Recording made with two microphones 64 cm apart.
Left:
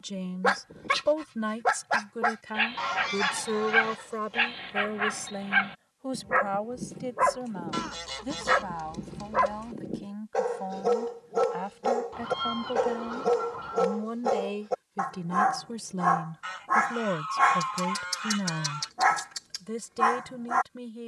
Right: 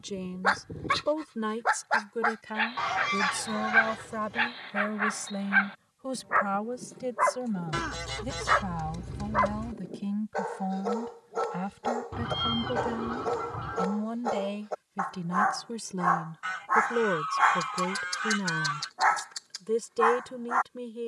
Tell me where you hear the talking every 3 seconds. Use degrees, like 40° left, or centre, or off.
10° left, 20° right, 50° right, 50° right, 30° right, 10° left, 10° left.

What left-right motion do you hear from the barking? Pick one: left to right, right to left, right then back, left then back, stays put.
stays put.